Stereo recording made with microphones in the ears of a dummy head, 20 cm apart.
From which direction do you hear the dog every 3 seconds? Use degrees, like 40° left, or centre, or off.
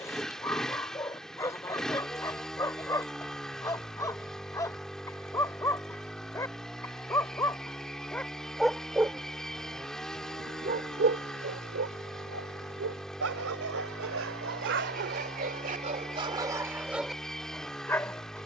10° left, 10° left, 10° left, 40° right, 60° right, 20° right.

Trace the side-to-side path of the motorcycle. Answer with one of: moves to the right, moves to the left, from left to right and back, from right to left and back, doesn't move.
doesn't move.